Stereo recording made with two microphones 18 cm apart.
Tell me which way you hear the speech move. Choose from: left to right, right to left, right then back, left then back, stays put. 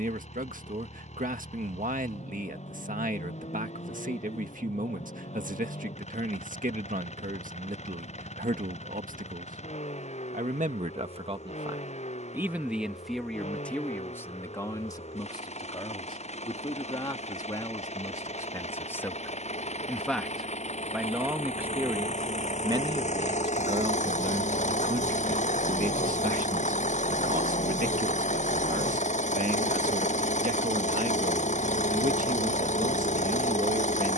left then back.